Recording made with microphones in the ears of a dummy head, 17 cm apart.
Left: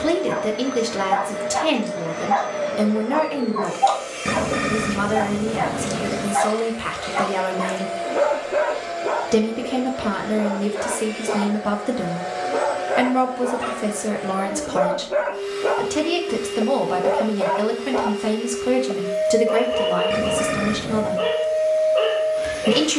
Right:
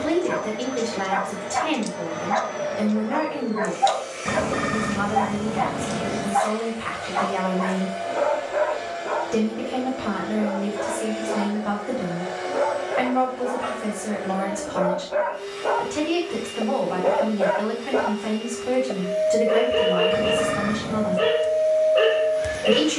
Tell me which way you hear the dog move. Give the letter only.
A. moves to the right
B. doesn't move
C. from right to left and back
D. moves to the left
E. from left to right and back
C.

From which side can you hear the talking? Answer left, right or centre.
left.